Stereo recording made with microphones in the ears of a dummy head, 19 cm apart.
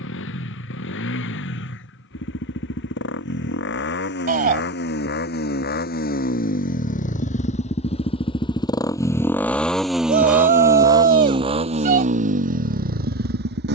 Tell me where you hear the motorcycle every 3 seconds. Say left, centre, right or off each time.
left, left, left, centre, right.